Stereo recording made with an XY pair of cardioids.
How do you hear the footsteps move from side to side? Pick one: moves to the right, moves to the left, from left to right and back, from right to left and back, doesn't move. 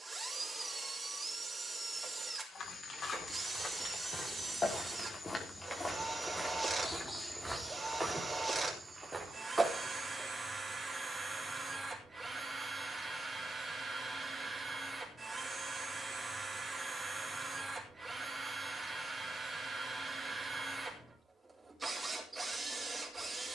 moves to the right.